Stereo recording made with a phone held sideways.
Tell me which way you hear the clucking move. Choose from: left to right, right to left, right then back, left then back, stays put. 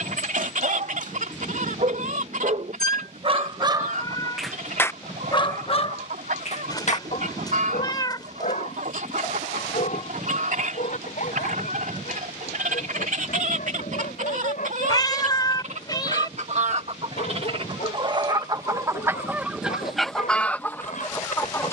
right to left.